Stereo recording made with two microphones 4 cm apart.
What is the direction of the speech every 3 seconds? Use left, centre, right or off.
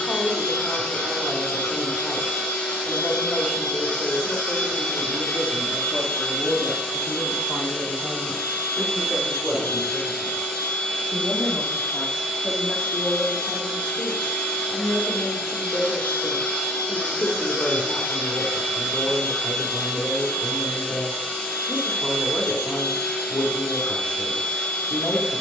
left, left, centre, centre, left, left, left, left, left.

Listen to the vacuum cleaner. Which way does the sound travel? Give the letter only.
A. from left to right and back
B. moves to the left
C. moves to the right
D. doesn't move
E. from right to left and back
D.